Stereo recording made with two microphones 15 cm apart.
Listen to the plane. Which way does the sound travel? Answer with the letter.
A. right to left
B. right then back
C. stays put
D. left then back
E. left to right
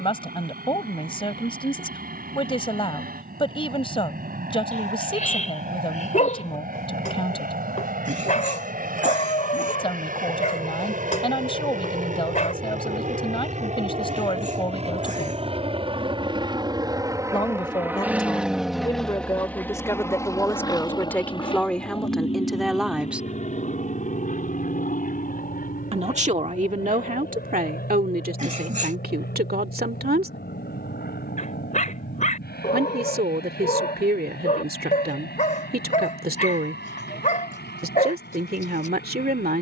A.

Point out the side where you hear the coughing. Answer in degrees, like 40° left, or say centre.
50° right.